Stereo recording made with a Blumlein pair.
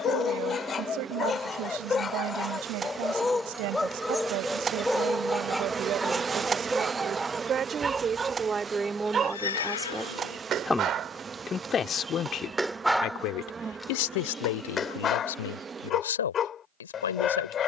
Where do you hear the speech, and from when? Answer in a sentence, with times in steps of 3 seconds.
You can hear the speech on the right from 0 s, in the centre from 9 s and on the left from 12 s.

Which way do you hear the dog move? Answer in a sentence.
You can hear the dog move from left to right and back again.